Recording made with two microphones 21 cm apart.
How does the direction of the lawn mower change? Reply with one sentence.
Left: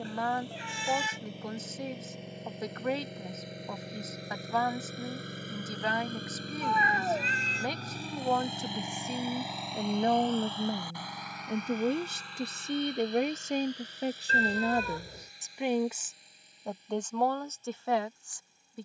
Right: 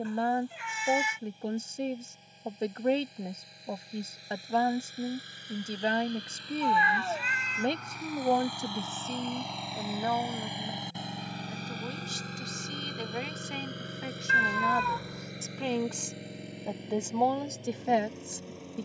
You can hear the lawn mower move from left to right.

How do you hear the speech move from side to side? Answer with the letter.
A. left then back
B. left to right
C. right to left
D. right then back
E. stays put
A.